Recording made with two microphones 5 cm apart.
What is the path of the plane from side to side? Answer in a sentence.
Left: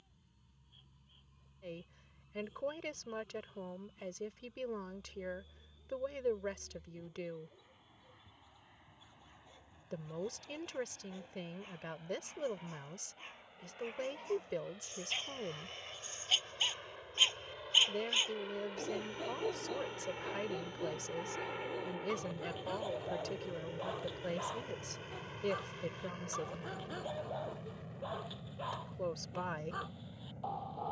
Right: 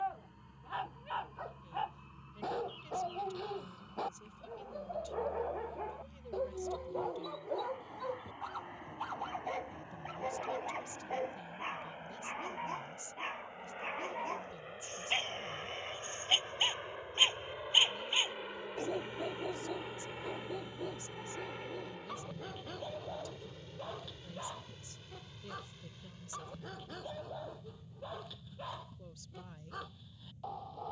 In this clip you hear the plane travel towards the left.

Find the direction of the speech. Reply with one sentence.
You can hear the speech on the left.